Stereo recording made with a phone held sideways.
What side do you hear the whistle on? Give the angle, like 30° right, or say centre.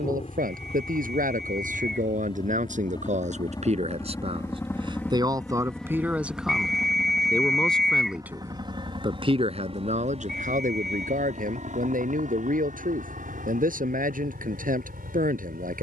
centre.